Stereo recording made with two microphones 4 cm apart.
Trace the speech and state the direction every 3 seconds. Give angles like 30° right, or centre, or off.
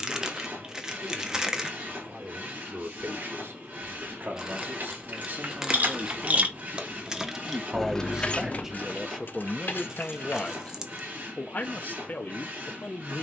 60° right, 50° right, 20° right, 20° left, 60° left.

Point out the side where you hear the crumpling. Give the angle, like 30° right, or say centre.
10° right.